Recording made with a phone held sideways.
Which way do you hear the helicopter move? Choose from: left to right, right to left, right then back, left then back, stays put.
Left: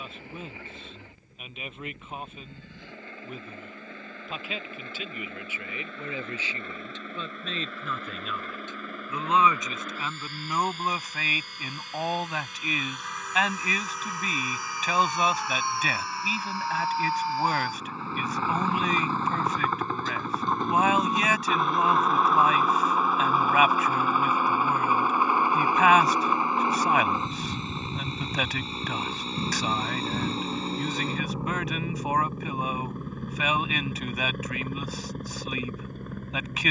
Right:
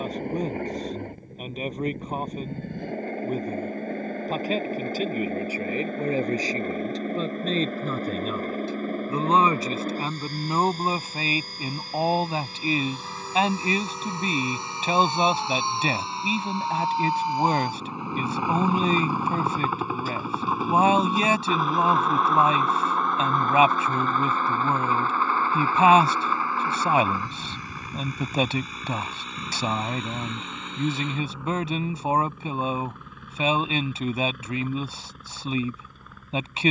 right to left.